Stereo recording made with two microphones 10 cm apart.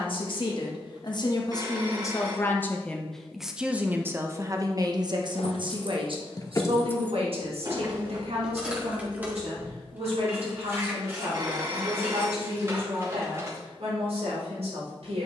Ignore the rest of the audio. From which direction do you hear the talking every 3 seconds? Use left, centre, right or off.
left, right, right, right, right.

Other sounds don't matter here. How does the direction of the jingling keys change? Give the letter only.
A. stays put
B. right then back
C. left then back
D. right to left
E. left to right
E.